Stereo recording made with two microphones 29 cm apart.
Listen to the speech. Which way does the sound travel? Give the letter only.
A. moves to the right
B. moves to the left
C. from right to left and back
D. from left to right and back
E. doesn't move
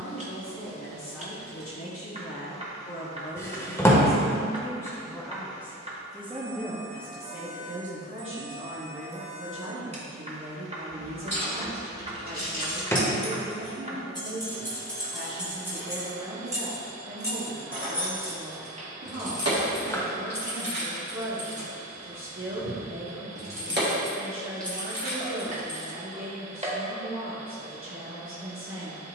A.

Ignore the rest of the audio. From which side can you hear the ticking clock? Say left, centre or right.
right.